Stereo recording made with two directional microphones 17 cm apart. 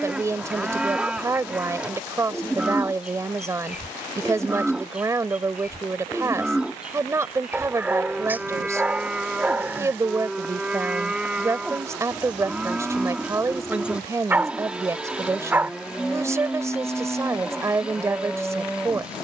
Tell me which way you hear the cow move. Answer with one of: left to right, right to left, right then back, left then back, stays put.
stays put.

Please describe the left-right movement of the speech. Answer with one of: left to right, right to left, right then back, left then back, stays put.
stays put.